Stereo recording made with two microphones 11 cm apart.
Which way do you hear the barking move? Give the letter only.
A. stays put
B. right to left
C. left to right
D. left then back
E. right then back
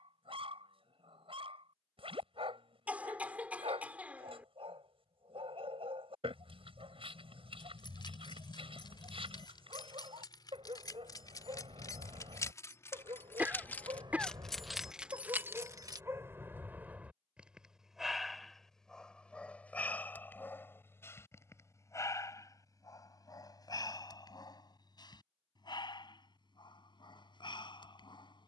B.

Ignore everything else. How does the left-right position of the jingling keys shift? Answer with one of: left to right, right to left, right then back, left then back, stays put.
left to right.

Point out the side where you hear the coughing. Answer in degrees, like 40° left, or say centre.
10° right.